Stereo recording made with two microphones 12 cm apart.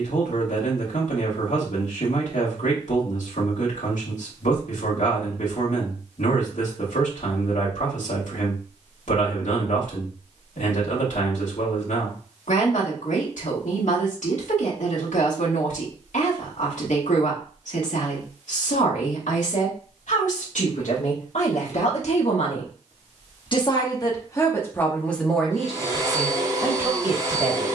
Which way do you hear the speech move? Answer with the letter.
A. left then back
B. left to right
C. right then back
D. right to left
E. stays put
B.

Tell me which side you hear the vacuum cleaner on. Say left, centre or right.
right.